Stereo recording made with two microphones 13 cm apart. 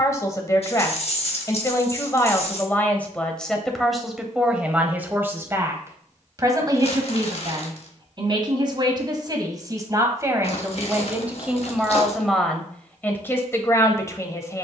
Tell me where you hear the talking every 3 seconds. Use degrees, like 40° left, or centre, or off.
20° left, 10° right, 30° right, 20° right, 20° left.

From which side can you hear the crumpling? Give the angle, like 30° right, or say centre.
50° left.